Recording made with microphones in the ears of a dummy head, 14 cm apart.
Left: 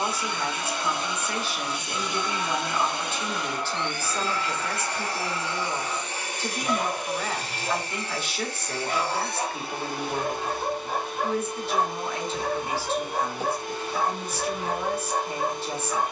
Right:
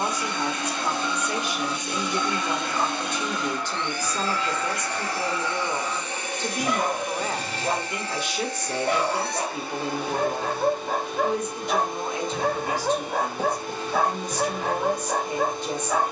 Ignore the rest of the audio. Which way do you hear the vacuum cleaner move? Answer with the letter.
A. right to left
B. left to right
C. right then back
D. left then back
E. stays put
E.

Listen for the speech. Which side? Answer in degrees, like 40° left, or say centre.
10° right.